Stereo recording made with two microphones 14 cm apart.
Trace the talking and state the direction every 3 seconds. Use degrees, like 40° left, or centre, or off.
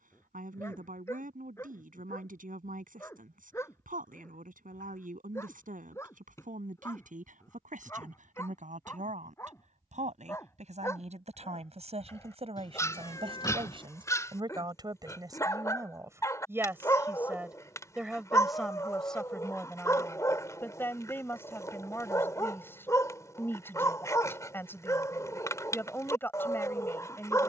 70° right, 70° right, 60° right, 50° right, 40° right, 20° right, 10° left, 20° left, 20° left.